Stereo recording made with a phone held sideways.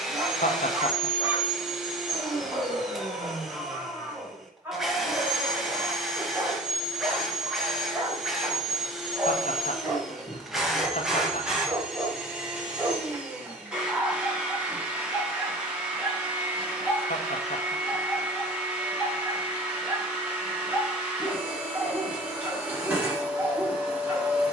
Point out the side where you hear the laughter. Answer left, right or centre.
left.